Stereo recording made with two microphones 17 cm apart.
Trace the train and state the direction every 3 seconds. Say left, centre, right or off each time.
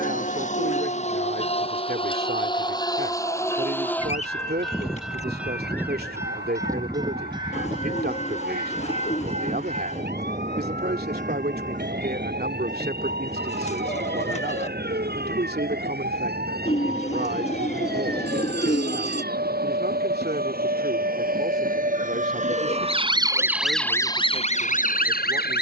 left, centre, right, right, right, right, right, right, right.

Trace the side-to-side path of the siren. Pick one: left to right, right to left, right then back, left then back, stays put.
right to left.